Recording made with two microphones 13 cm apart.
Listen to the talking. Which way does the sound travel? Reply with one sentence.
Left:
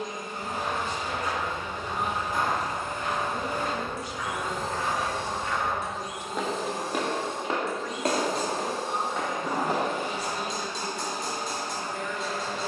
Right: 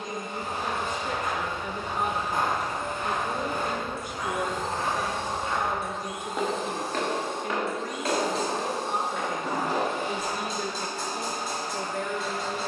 You can hear the talking stay in one place.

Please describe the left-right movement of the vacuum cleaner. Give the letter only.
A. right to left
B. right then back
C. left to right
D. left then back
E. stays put
E.